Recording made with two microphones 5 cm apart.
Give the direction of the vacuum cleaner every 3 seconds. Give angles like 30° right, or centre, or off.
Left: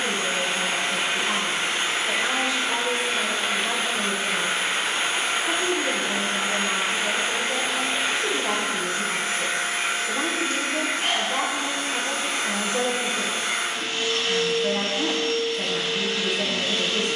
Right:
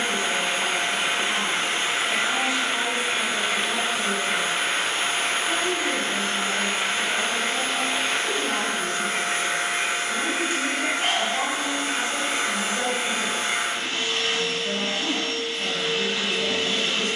20° right, centre, 10° left, 10° right, 20° right, 20° right.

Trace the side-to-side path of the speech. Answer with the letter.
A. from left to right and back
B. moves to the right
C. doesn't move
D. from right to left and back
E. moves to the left
C.